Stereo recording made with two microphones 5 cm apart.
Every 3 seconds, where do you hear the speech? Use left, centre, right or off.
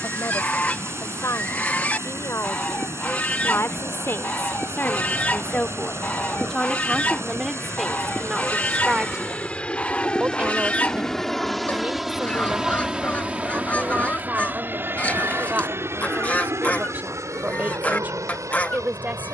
left, left, centre, right, right, right, right.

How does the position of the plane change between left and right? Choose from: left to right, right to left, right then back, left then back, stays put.
left to right.